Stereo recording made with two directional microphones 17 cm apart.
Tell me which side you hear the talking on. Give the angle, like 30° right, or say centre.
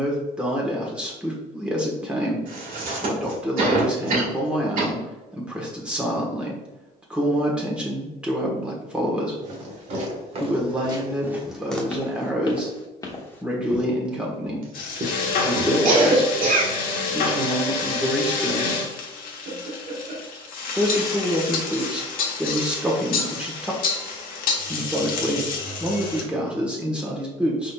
10° right.